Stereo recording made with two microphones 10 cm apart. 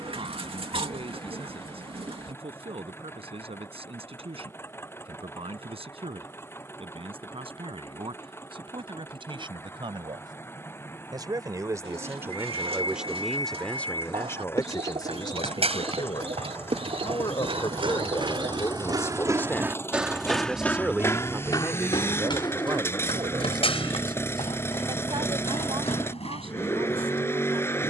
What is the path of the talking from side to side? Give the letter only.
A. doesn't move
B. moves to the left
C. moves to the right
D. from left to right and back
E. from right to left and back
E.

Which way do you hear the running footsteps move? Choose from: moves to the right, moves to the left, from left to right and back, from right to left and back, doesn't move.
moves to the left.